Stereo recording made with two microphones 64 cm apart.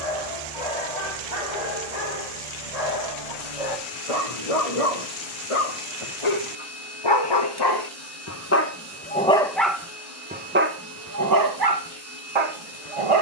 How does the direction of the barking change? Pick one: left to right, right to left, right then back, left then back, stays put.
left to right.